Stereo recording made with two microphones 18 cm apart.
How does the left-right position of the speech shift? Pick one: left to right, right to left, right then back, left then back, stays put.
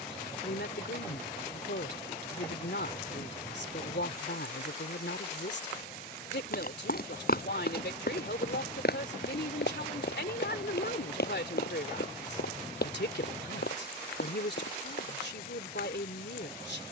stays put.